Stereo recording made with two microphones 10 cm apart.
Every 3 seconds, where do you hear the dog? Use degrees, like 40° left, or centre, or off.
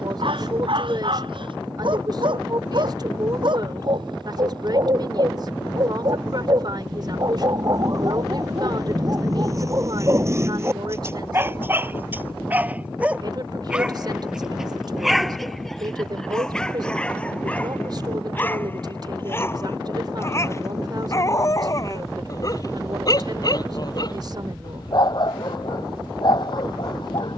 60° right, 50° right, 40° right, 30° right, 10° right, 10° left, 20° left, 40° left, 50° left.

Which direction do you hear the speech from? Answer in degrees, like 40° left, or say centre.
50° right.